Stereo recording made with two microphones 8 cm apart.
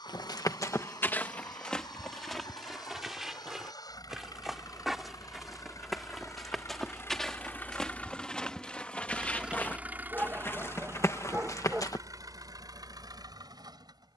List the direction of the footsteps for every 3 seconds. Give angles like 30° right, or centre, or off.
20° left, centre, 10° left, 30° left, off.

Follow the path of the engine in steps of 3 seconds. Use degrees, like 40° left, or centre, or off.
70° left, 60° left, 30° left, 30° right, 60° right.